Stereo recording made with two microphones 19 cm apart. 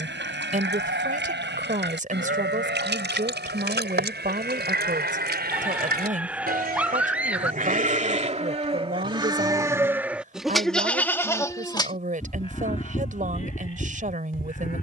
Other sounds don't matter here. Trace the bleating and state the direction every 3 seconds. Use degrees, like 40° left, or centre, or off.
70° right, 70° right, 40° right, centre, 40° left.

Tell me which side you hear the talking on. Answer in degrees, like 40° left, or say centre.
50° right.